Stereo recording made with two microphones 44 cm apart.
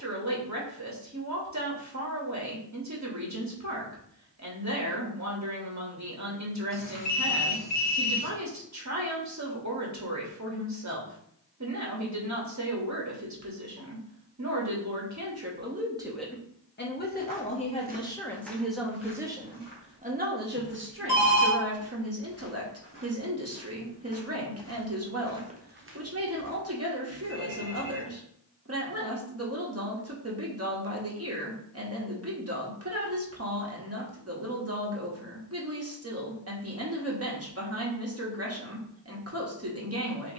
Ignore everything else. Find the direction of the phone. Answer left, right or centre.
left.